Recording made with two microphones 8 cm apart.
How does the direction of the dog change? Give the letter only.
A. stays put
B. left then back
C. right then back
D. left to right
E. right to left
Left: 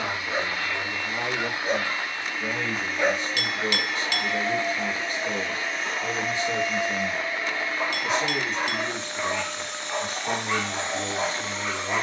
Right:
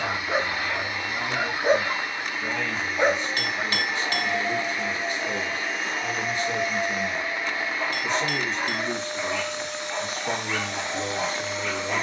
E.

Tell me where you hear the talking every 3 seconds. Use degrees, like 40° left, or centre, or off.
60° left, 40° left, 10° left, 10° right.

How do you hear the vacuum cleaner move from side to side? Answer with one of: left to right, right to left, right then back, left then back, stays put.
stays put.